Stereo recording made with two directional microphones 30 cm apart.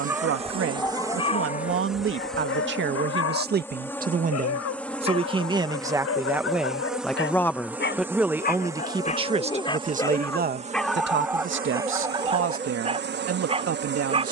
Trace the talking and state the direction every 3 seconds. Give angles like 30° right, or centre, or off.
40° right, 20° right, centre, 30° right, 50° right.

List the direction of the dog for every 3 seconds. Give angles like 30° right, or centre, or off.
20° left, 50° left, 40° left, centre, 20° right.